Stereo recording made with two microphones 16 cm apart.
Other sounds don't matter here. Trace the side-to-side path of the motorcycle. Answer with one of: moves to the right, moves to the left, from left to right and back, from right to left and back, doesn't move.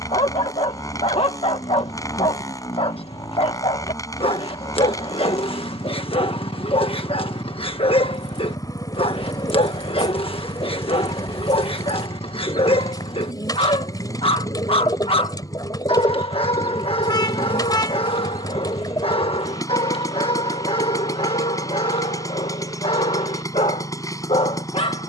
doesn't move.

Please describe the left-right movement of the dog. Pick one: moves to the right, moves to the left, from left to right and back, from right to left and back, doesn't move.
doesn't move.